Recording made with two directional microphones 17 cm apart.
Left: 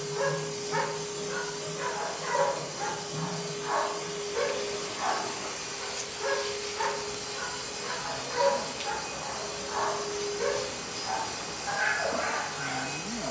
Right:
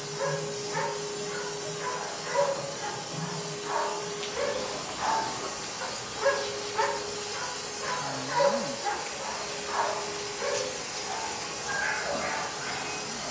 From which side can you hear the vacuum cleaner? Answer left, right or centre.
centre.